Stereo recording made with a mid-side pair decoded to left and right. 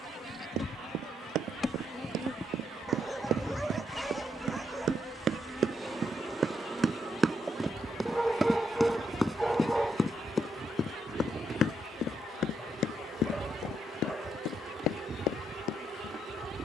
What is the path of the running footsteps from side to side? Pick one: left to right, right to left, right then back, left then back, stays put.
right to left.